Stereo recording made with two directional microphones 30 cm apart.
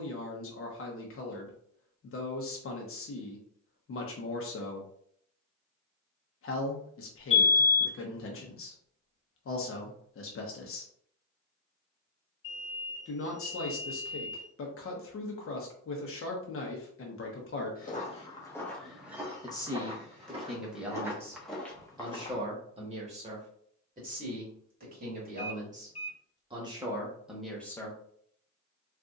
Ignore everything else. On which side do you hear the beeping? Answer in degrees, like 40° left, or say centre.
20° left.